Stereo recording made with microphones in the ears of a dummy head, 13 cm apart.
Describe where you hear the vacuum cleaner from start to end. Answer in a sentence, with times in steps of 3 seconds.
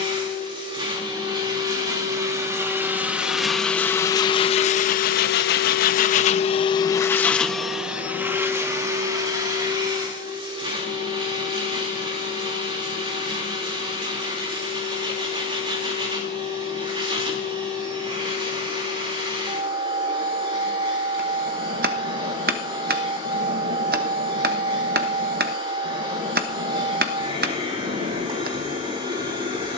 You can hear the vacuum cleaner on the right from 0 s, on the left from 3 s, in the centre from 6 s and on the right from 9 s.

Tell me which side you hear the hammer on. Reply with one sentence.
You can hear the hammer on the right.